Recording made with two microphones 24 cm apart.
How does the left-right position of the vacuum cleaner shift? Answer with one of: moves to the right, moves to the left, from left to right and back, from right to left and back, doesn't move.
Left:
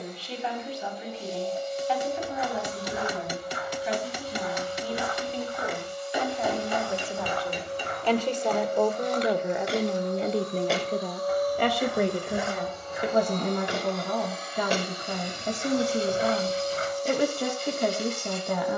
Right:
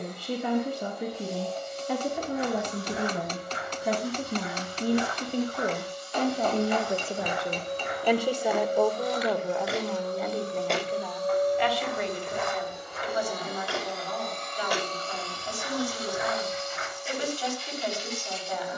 moves to the left.